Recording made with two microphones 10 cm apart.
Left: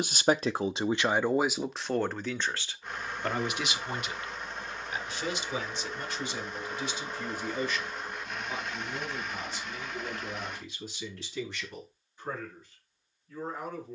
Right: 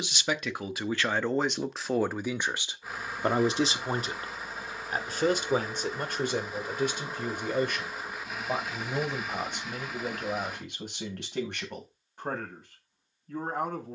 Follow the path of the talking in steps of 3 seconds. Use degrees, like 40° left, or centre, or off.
10° left, 40° right, 50° right, 50° right, 60° right.